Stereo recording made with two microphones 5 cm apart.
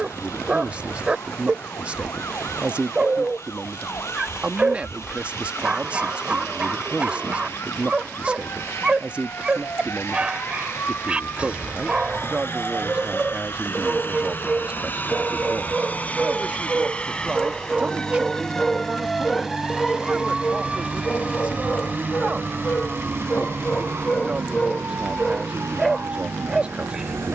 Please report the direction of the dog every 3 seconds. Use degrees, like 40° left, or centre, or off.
20° right, 20° right, 20° right, 20° right, 20° right, 20° right, 10° left, 30° left, 10° left.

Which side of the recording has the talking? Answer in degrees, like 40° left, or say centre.
30° right.